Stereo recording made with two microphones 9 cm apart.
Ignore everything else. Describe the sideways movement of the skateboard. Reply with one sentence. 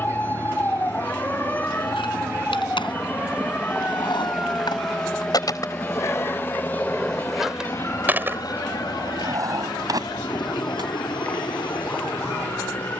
You can hear the skateboard move from left to right.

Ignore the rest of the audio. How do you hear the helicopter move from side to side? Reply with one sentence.
You can hear the helicopter travel towards the left.